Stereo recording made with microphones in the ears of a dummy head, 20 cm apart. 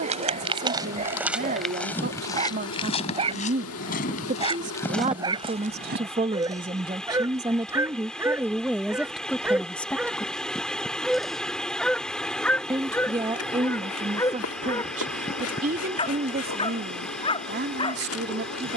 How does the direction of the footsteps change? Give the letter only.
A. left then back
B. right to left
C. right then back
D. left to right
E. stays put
A.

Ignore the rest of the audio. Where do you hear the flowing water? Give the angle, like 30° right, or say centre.
centre.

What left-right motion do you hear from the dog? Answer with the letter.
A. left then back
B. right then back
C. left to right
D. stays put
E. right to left
E.